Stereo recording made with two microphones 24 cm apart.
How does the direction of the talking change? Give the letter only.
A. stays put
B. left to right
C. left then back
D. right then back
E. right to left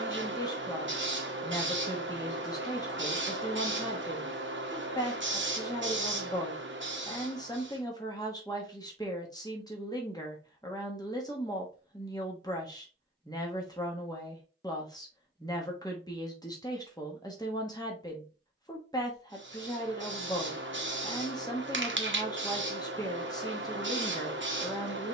A.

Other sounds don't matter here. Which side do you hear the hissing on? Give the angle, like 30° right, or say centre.
50° right.